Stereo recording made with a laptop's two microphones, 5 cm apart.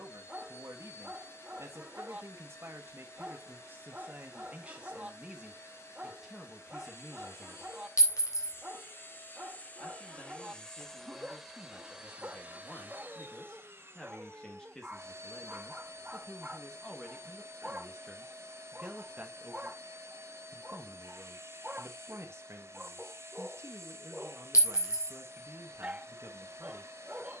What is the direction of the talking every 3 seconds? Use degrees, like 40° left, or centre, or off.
60° right, 30° right, centre, 30° left, 20° left, centre, 30° right, 50° right, 50° right.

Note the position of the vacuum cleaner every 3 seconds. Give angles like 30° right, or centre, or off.
60° left, 60° left, 50° left, 10° left, 40° right, 50° right, 50° right, 50° right, 50° right.